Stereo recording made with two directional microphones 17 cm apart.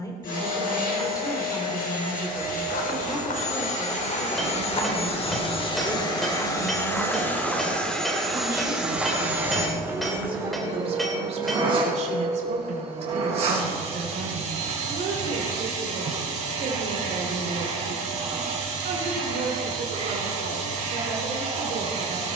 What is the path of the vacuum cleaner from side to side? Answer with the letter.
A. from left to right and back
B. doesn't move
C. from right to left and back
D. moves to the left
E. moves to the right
E.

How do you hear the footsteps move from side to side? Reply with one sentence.
You can hear the footsteps move from left to right.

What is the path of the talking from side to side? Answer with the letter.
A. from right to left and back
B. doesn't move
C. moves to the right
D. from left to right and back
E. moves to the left
C.